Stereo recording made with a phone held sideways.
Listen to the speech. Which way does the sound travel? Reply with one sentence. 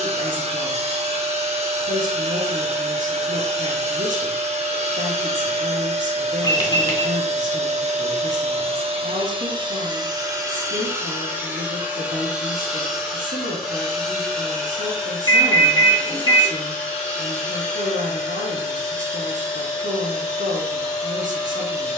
You can hear the speech stay in one place.